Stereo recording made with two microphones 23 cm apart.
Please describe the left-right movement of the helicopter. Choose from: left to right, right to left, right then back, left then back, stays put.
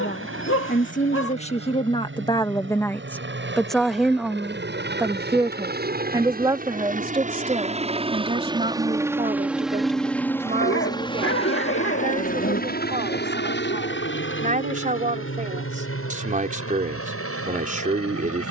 right to left.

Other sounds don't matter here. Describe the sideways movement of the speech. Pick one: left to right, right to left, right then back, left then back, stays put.
left to right.